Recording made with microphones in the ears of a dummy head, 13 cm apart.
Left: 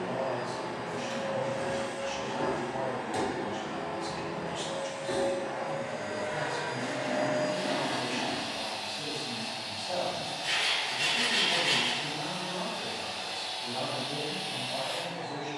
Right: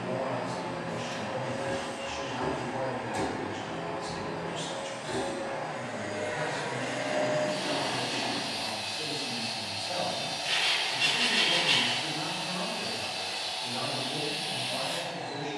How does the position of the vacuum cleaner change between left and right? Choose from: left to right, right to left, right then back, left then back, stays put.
left to right.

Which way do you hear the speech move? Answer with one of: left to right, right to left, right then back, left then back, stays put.
stays put.